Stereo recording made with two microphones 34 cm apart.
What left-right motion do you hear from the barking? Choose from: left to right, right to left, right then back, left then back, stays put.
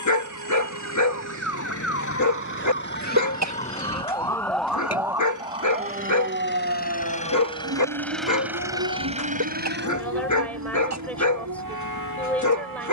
stays put.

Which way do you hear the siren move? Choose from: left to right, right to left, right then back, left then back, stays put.
left to right.